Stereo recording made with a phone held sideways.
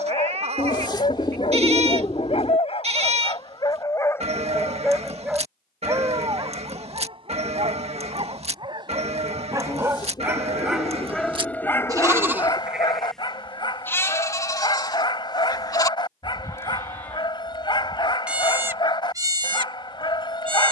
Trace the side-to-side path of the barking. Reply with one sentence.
In this clip you hear the barking move from left to right and back again.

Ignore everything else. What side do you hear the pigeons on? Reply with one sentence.
You can hear the pigeons on the left.